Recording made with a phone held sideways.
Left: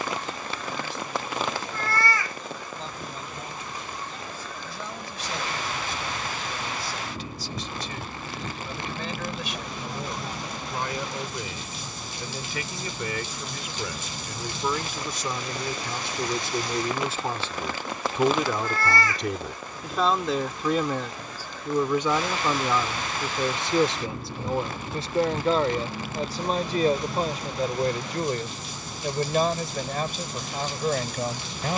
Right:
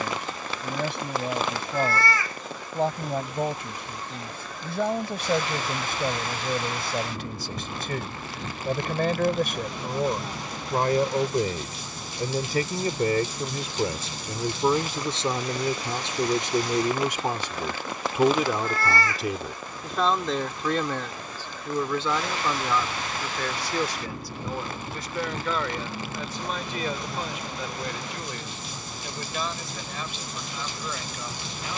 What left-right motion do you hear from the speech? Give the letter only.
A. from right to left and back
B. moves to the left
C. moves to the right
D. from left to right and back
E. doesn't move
B.